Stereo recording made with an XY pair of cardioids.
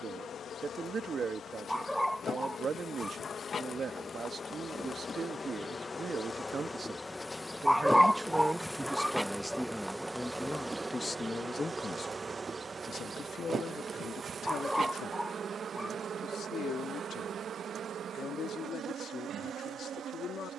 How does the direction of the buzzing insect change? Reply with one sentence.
You can hear the buzzing insect move from left to right.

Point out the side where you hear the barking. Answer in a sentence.
In this clip you hear the barking in the centre.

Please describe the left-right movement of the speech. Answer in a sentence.
In this clip you hear the speech go from the right side to the left.